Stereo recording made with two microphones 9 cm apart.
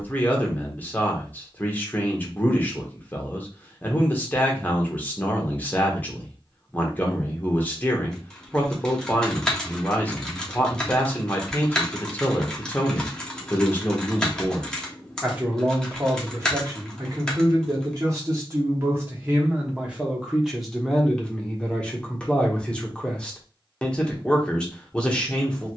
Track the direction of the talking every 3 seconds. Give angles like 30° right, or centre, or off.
20° left, 20° left, 20° left, 20° left, 10° left, 30° right, 20° right, 10° left, 10° left.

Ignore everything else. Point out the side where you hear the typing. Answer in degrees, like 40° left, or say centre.
10° left.